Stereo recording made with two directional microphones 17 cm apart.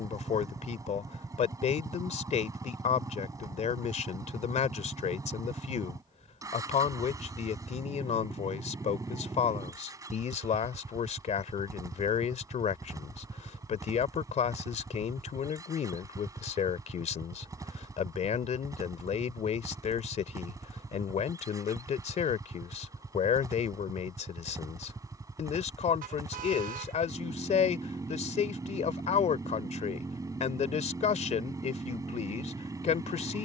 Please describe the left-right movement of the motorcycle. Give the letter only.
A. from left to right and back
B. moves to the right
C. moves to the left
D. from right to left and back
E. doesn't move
E.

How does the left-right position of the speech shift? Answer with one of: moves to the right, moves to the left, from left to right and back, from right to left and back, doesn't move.
doesn't move.